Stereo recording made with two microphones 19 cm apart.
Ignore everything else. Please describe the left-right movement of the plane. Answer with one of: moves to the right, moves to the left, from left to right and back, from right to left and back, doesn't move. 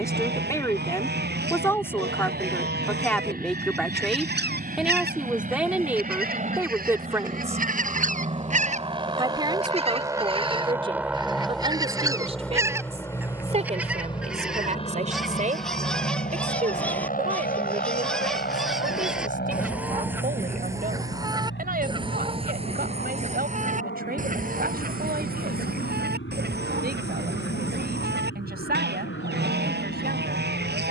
moves to the left.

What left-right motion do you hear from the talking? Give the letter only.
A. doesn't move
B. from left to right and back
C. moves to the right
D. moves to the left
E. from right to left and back
C.